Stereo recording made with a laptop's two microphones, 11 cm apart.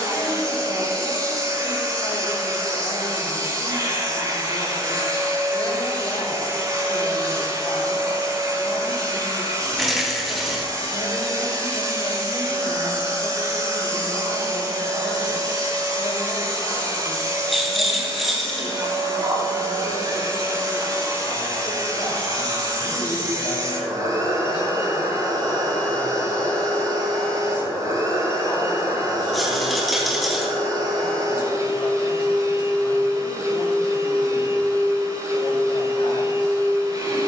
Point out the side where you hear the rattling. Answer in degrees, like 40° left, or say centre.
centre.